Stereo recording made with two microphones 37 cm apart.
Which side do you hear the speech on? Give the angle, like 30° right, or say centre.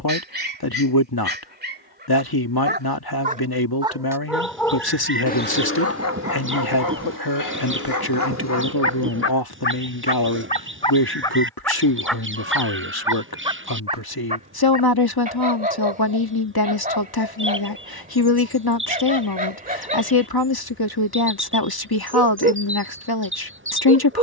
80° left.